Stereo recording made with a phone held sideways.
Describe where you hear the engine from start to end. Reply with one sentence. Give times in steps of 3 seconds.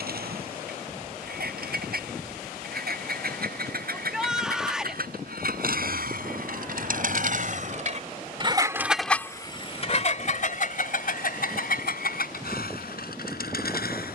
You can hear the engine on the right from 0 s and on the left from 9 s.